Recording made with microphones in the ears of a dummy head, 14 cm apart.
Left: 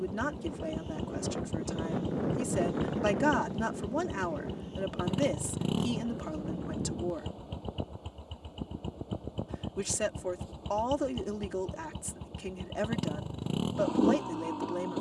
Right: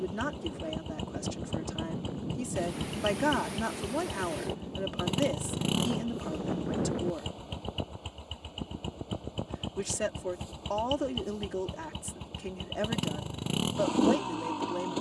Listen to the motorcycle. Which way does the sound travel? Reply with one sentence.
In this clip you hear the motorcycle stay in one place.